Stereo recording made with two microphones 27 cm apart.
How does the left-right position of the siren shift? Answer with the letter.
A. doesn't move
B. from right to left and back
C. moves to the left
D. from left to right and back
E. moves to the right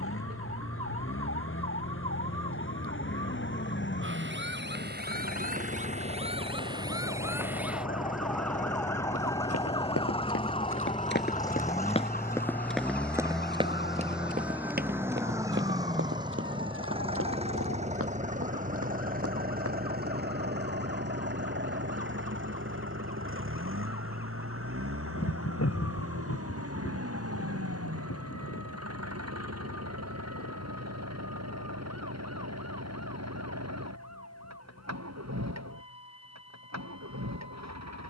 C.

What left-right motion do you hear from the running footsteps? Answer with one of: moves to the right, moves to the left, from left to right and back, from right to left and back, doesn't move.
moves to the right.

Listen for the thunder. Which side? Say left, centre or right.
left.